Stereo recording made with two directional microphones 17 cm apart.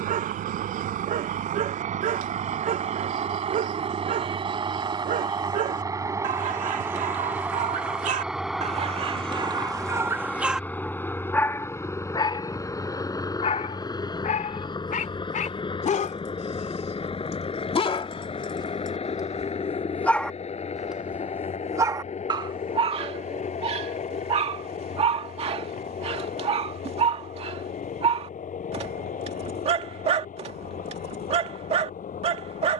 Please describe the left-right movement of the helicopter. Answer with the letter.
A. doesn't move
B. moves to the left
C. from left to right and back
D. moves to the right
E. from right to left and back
B.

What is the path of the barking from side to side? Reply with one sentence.
You can hear the barking move from right to left and back again.